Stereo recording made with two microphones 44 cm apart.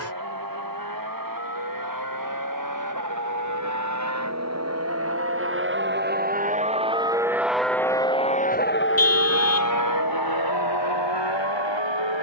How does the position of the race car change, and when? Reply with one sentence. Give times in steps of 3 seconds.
In this clip you hear the race car on the right from 0 s, in the centre from 6 s and on the left from 9 s.